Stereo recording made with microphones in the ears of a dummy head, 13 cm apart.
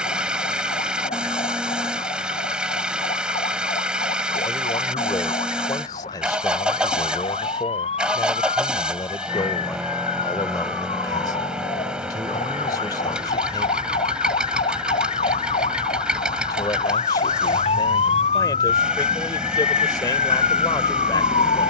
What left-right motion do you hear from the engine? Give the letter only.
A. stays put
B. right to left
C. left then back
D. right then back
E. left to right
A.